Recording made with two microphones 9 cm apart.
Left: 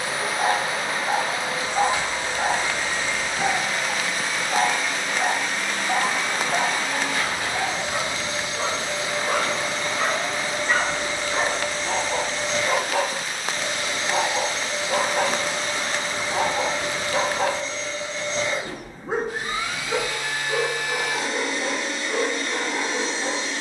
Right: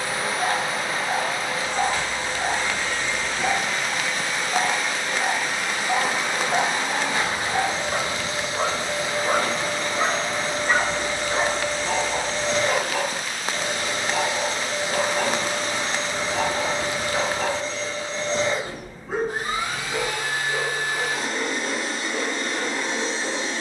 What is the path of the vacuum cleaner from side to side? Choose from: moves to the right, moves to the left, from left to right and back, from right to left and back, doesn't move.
moves to the right.